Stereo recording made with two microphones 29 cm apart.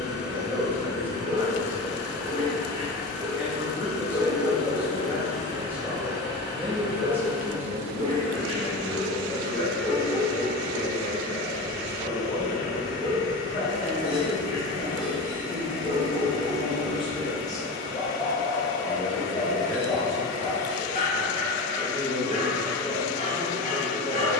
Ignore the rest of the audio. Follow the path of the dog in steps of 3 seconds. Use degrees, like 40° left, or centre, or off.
60° right, 60° right, 30° right, 10° left, 30° left, 30° left, 30° left, 30° left.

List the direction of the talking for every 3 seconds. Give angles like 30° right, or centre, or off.
10° right, 10° right, centre, 50° left, 50° left, 20° left, 10° left, 10° left.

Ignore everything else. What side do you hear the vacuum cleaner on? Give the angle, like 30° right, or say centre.
50° left.